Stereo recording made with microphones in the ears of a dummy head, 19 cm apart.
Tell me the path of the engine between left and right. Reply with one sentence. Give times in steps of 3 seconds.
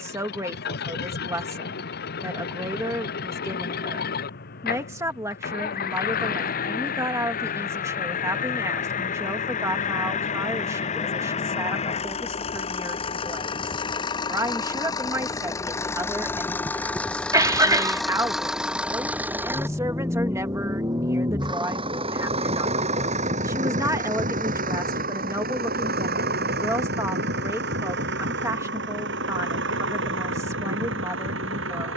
In this clip you hear the engine on the left from 0 s, in the centre from 15 s and on the right from 21 s.